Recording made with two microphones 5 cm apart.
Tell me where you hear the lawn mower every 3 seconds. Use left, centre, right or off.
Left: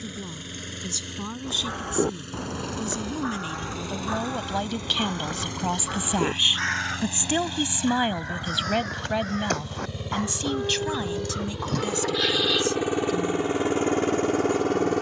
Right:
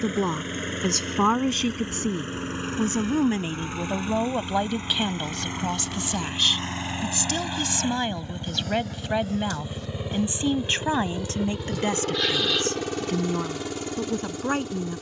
right, right, right, centre, left.